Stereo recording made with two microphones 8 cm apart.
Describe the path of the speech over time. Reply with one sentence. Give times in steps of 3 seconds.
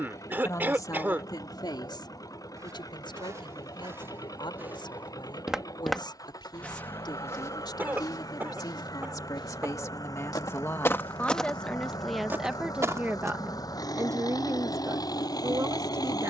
You can hear the speech on the left from 0 s and on the right from 12 s.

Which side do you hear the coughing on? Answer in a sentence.
In this clip you hear the coughing on the right.